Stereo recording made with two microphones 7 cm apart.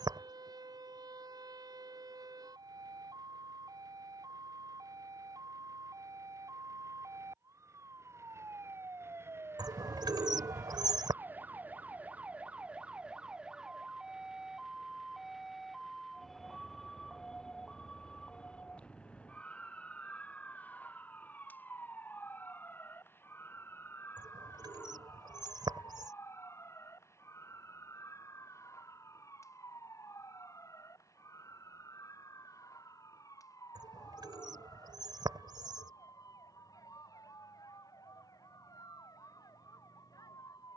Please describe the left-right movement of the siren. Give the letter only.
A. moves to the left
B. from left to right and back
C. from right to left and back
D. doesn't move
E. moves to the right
A.